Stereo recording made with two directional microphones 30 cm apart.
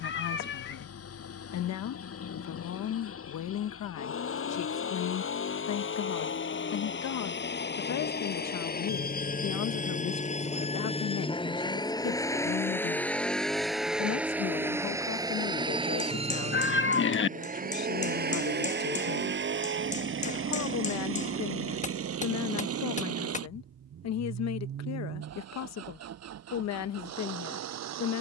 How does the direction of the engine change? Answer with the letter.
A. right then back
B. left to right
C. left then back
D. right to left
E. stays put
B.